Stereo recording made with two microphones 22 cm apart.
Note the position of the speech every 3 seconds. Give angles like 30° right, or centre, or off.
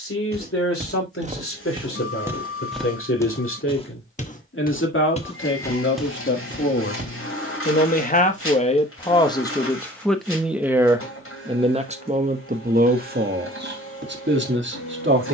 70° left, 60° left, 40° left, centre, 50° right.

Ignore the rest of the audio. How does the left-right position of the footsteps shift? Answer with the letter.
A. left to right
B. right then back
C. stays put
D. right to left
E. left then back
E.